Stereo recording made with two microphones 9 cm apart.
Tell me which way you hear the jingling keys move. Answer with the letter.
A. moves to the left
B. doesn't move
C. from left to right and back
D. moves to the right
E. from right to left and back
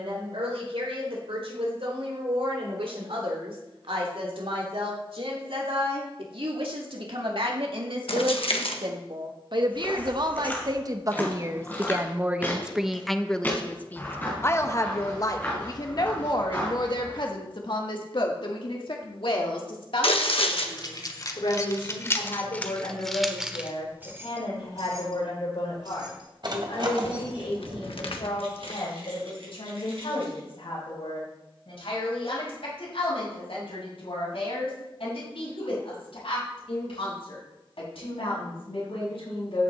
D.